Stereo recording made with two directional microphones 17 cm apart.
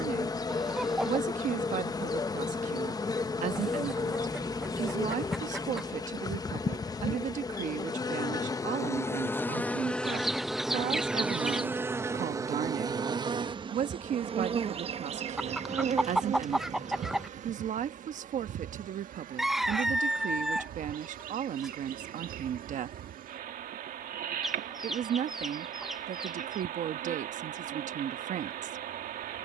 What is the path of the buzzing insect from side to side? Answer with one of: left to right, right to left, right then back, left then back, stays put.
left to right.